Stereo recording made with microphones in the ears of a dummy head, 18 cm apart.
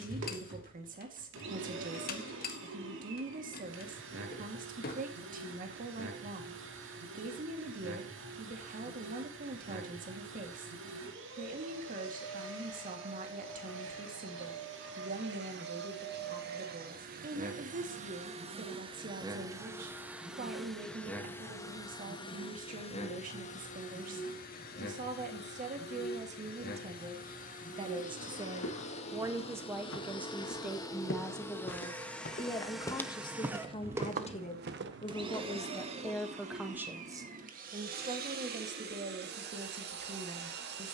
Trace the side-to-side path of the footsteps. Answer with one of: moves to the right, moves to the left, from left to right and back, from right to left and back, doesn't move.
moves to the right.